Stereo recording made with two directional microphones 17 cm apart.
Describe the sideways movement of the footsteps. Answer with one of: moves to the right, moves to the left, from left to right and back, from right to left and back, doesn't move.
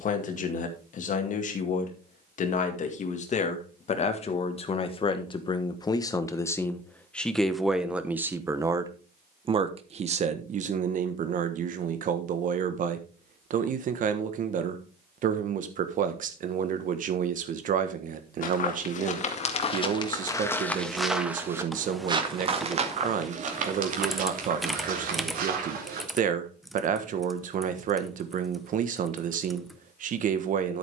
moves to the right.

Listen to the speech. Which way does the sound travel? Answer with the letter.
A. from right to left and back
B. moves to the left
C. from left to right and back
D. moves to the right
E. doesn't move
D.